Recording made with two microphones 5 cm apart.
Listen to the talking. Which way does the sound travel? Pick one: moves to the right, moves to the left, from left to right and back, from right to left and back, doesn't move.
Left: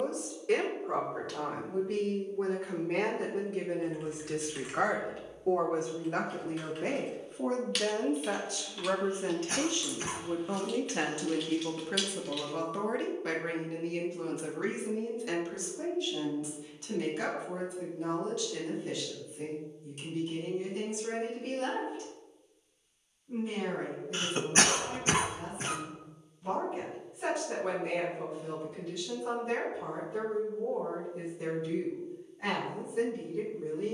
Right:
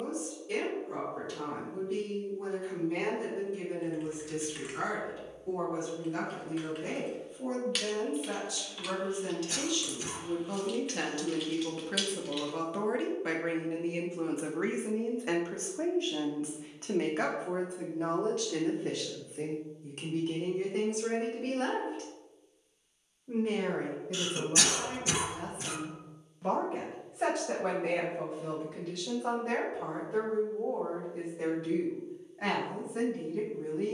moves to the right.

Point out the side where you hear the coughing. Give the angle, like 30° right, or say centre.
40° left.